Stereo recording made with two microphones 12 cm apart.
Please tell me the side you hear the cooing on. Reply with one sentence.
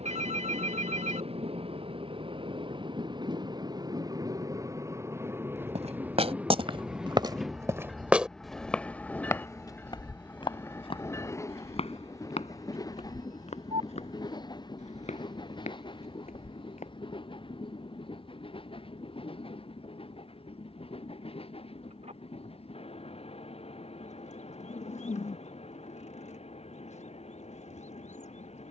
In this clip you hear the cooing on the left.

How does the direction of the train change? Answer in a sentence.
In this clip you hear the train go from the right side to the left.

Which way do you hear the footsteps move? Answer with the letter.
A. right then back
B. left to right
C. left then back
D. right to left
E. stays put
D.